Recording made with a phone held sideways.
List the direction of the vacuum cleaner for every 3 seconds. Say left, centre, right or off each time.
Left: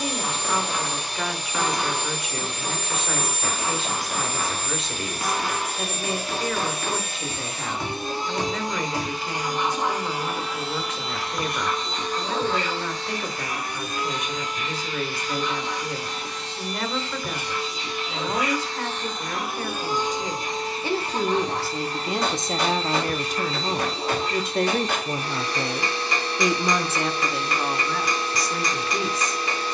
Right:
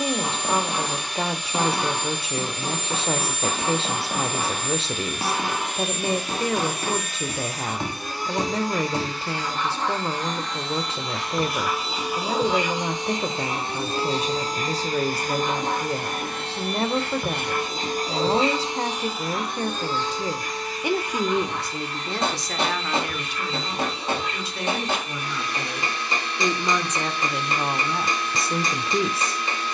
left, left, left, centre, right, right, centre, left, left, left.